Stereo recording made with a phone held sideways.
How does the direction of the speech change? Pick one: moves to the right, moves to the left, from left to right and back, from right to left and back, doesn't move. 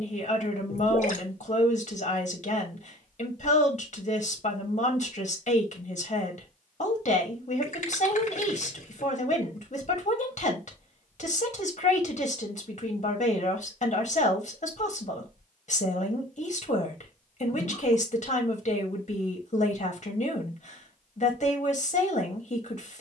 doesn't move.